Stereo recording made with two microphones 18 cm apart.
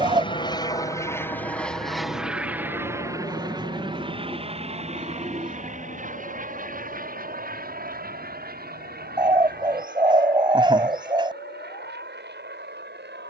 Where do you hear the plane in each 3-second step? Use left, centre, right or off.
centre, right, right, right, right.